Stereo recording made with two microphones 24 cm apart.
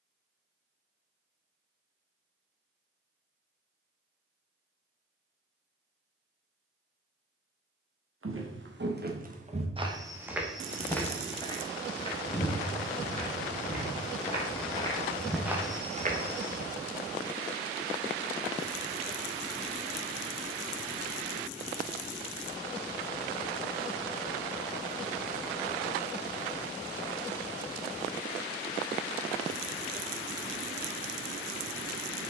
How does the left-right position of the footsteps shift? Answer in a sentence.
You can hear the footsteps go left and come back.